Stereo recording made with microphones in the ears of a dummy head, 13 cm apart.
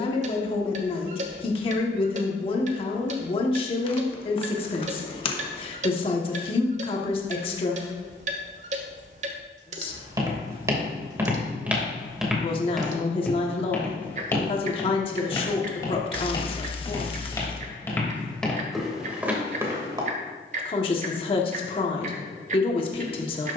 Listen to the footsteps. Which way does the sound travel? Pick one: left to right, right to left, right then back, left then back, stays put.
left then back.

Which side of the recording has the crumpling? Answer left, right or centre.
left.